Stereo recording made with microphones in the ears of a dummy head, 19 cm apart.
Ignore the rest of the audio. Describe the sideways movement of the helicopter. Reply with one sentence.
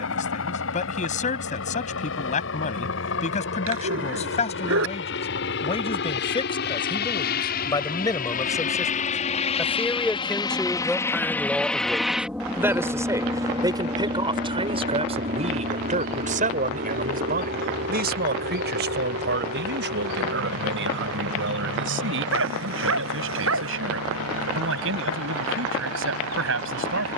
You can hear the helicopter move to the right.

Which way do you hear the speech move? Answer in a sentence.
In this clip you hear the speech move from left to right.